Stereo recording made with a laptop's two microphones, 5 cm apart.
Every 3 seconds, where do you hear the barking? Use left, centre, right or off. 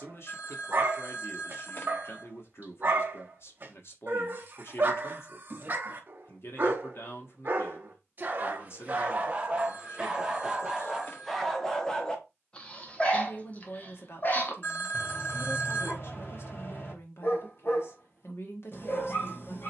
right, right, right, centre, left, left, left.